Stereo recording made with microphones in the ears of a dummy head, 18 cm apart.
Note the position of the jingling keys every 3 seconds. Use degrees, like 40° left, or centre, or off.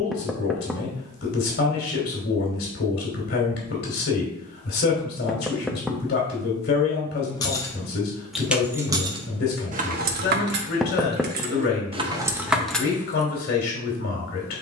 off, off, centre, 50° right, centre.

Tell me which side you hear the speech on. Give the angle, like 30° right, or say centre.
50° left.